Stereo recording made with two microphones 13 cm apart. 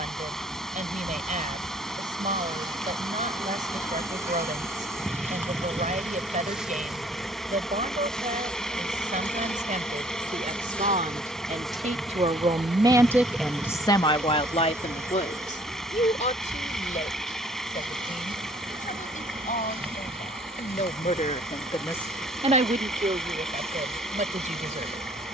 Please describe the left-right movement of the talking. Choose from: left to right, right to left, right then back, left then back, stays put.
left then back.